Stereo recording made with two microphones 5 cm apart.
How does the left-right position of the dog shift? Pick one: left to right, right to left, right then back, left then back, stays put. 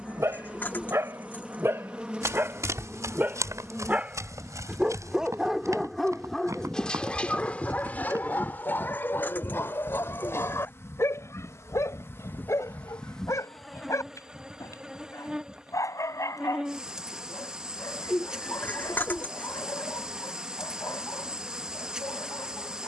right to left.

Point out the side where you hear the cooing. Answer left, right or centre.
left.